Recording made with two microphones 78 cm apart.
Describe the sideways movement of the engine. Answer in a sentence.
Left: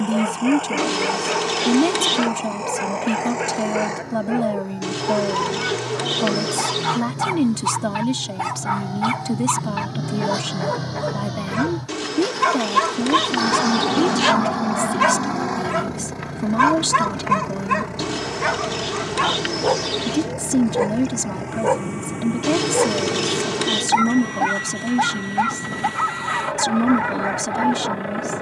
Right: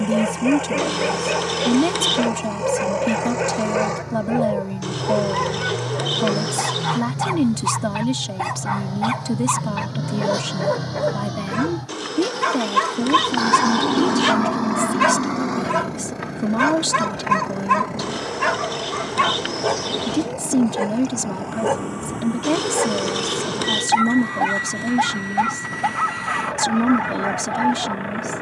You can hear the engine go from the right side to the left.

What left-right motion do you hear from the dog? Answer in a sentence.
In this clip you hear the dog travel towards the right.